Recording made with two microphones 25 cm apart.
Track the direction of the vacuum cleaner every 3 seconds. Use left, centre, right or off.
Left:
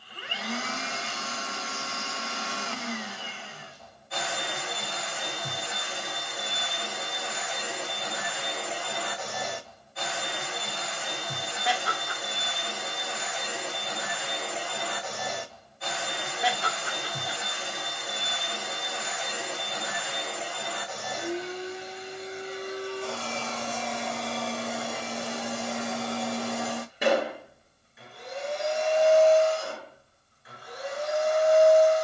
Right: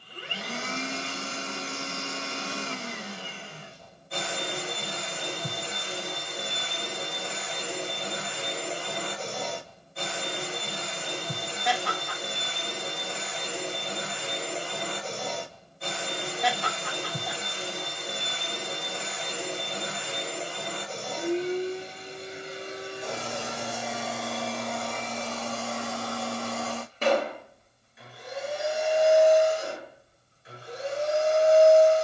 right, right, right, right, right, right, right, right, centre, centre, right.